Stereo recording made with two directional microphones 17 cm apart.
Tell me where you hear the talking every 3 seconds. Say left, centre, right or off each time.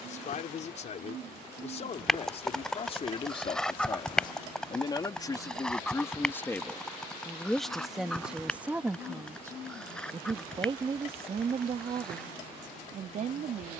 left, left, centre, right, right.